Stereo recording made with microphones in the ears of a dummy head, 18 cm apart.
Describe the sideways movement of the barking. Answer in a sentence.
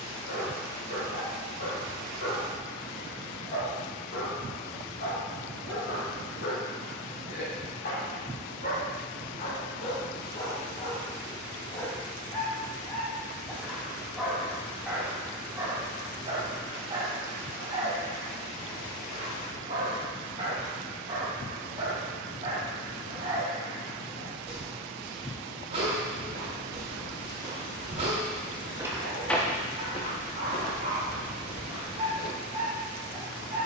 In this clip you hear the barking move to the right.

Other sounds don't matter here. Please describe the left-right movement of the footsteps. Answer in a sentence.
You can hear the footsteps move to the left.